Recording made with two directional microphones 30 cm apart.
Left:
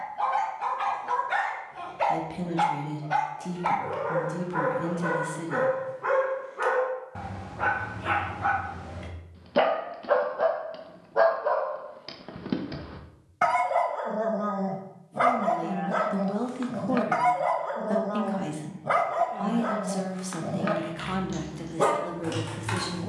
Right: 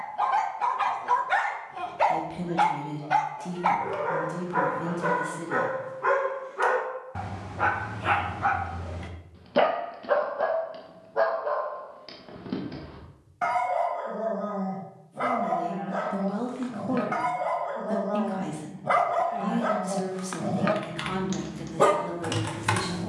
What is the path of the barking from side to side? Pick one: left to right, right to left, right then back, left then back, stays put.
left then back.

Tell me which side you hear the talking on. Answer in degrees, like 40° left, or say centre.
10° left.